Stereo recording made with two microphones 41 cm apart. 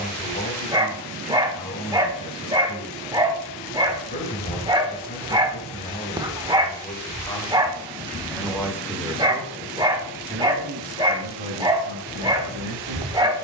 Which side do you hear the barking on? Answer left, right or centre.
centre.